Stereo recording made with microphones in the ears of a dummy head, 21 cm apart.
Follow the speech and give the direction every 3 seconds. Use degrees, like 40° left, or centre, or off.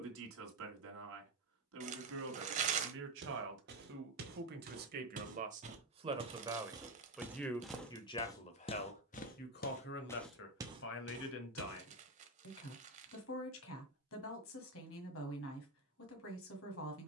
60° right, 50° right, 10° left, 50° left, 60° left, 60° left.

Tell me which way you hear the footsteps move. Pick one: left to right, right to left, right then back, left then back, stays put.
left then back.